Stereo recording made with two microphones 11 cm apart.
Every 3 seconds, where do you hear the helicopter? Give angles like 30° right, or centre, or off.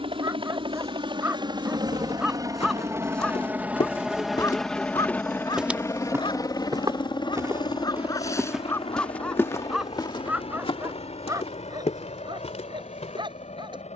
40° right, centre, 40° left, 60° left, 70° left.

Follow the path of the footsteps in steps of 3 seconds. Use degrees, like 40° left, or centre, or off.
80° left, 30° left, 20° right, 50° left, 80° left.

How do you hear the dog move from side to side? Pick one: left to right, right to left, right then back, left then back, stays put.
left then back.